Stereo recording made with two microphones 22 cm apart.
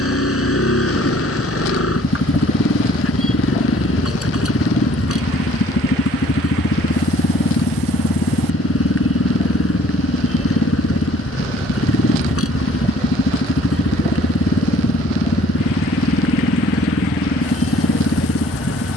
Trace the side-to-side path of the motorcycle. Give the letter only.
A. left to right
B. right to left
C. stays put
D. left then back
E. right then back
C.